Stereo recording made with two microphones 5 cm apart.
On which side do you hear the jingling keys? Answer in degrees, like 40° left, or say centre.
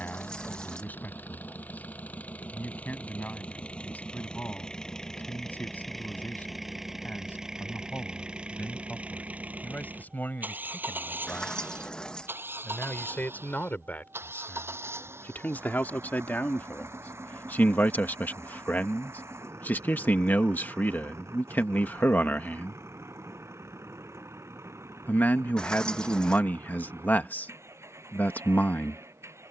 20° left.